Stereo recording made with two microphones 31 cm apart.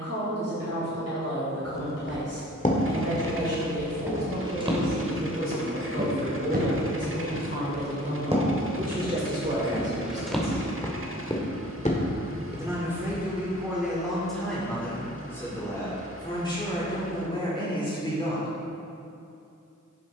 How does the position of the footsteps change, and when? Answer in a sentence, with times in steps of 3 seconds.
In this clip you hear the footsteps on the left from 0 s, in the centre from 3 s, on the right from 6 s, in the centre from 9 s, on the left from 12 s and not at all from 15 s.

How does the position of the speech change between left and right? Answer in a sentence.
In this clip you hear the speech go from the right side to the left.